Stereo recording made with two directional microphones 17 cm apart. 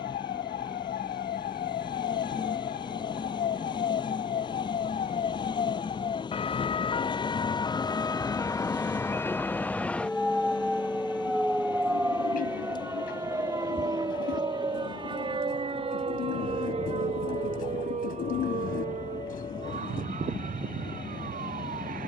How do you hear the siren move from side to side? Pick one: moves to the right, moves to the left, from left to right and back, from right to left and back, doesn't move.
moves to the right.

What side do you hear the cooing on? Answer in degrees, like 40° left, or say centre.
60° left.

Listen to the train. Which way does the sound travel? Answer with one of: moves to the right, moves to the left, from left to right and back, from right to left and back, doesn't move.
doesn't move.